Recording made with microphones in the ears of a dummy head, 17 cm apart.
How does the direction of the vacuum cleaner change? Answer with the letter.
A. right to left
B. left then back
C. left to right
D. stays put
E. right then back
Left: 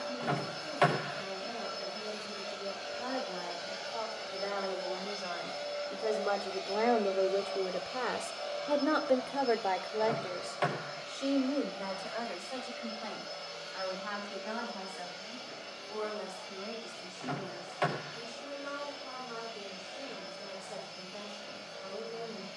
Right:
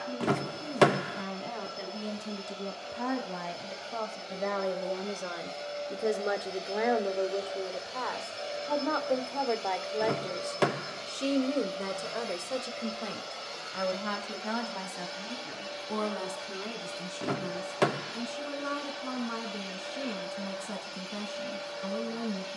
C.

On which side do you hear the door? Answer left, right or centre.
right.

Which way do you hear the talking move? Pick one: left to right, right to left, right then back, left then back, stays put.
left then back.